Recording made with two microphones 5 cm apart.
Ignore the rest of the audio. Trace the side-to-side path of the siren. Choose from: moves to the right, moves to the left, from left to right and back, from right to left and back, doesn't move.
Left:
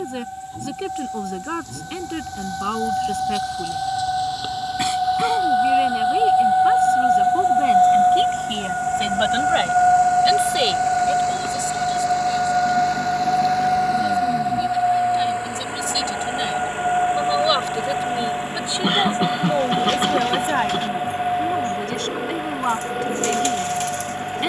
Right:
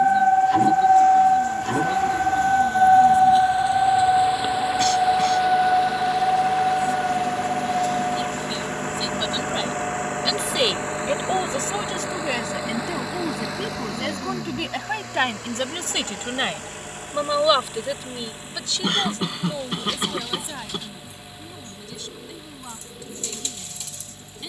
moves to the left.